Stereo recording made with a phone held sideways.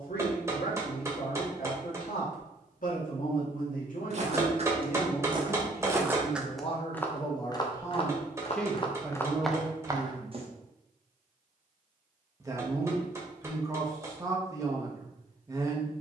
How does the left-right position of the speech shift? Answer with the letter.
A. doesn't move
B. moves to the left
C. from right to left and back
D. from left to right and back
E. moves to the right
E.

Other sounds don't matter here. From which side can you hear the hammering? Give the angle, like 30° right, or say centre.
20° right.